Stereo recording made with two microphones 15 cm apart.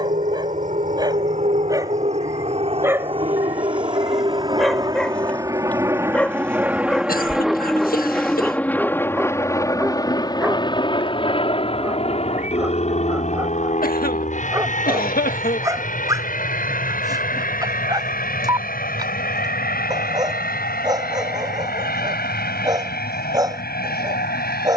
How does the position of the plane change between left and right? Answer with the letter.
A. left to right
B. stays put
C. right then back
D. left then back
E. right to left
E.